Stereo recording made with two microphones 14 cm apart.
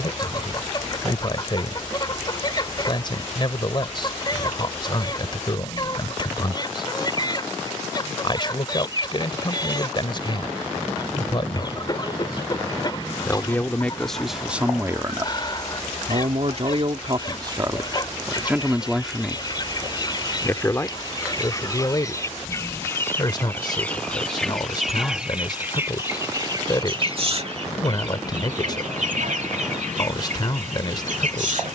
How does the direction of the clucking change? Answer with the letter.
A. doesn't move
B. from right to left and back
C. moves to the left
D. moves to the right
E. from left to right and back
D.